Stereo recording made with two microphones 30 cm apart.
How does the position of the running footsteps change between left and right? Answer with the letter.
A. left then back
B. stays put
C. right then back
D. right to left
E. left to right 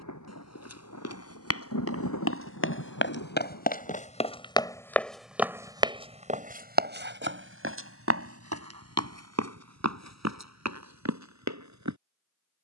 E.